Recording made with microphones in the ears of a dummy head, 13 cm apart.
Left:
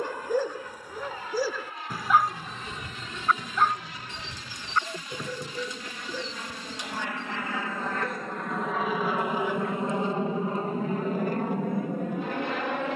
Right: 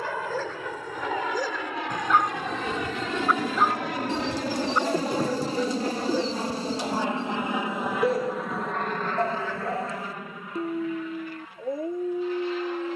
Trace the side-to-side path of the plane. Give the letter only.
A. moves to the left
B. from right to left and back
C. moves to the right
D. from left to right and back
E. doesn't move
A.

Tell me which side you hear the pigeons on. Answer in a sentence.
You can hear the pigeons on the right.